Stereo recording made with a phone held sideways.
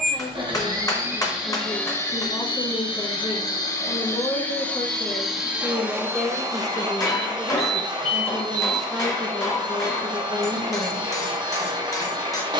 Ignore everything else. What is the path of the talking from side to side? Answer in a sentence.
You can hear the talking go right and come back.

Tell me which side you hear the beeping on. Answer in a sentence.
You can hear the beeping on the right.